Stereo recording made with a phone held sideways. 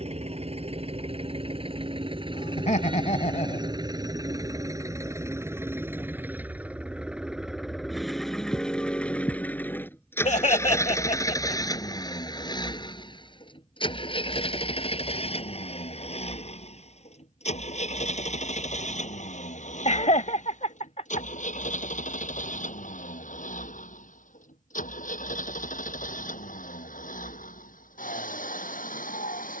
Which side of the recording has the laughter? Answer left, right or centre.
left.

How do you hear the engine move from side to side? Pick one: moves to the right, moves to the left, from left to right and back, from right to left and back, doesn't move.
moves to the left.